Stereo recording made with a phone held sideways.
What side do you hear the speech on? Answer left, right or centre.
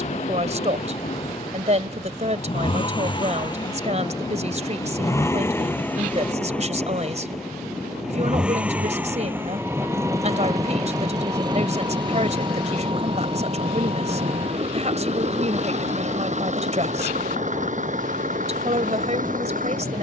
right.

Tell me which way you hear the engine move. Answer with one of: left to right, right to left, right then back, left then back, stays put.
left to right.